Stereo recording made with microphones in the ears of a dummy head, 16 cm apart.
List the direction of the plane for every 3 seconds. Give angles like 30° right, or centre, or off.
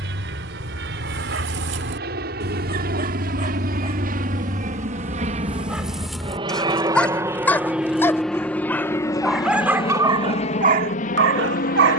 60° right, 50° right, 10° right, 30° left.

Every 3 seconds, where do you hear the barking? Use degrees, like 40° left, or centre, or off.
70° right, 20° right, 10° left, 40° right.